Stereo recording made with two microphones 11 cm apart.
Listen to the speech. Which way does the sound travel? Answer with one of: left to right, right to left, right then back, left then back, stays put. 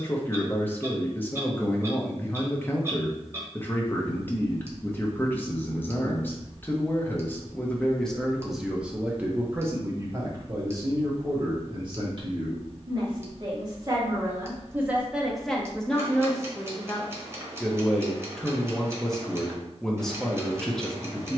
right then back.